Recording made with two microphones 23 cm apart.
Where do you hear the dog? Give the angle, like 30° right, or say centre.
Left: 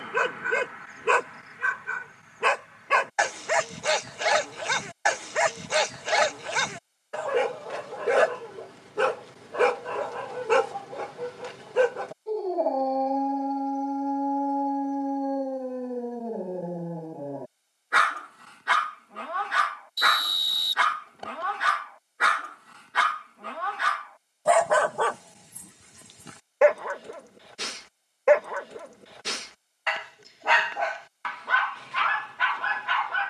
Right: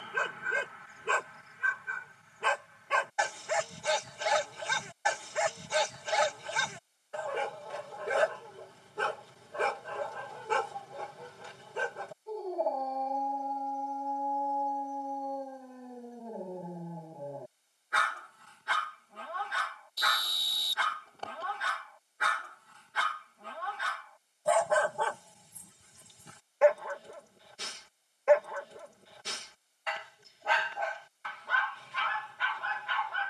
80° left.